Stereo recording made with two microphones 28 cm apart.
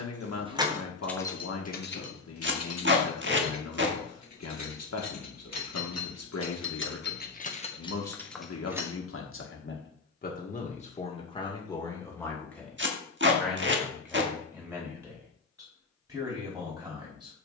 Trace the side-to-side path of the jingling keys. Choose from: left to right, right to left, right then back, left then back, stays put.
left then back.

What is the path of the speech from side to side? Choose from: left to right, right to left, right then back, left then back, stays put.
left to right.